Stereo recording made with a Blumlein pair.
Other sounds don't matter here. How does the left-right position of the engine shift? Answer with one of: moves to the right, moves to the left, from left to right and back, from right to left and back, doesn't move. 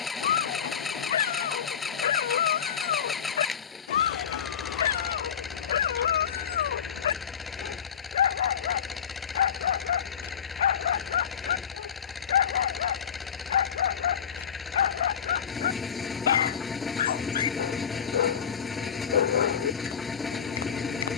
doesn't move.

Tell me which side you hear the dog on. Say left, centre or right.
left.